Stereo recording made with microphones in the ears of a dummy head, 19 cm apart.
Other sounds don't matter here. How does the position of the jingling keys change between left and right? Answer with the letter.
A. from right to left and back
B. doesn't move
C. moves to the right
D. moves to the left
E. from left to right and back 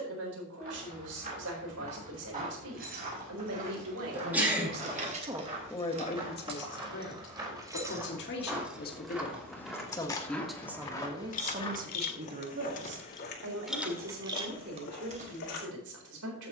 A.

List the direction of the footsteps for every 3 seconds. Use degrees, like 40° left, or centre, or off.
40° right, 30° right, 20° right, 10° left, 50° left, 70° left.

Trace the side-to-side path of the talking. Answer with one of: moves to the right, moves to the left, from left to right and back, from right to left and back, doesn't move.
from right to left and back.